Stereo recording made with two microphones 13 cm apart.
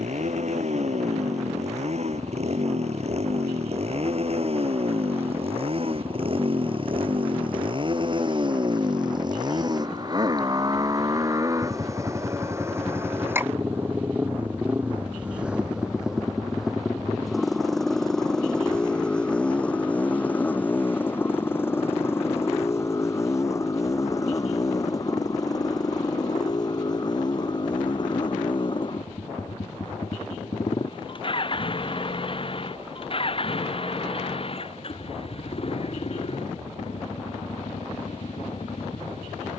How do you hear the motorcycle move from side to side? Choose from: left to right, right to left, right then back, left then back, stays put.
right to left.